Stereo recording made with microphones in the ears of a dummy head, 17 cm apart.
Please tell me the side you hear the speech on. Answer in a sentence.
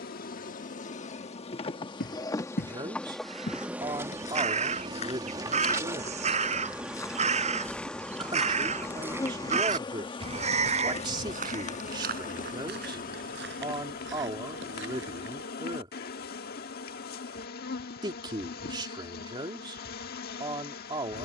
You can hear the speech on the right.